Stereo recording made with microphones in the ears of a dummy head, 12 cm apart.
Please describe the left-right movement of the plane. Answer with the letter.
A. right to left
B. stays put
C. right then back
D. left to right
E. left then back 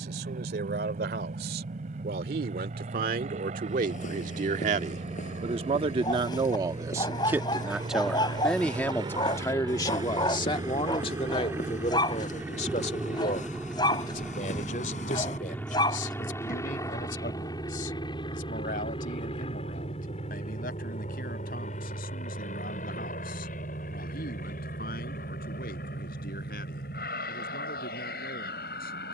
A.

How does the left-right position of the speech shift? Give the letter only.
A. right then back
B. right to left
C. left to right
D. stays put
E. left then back
B.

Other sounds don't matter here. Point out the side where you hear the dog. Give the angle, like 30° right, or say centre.
30° left.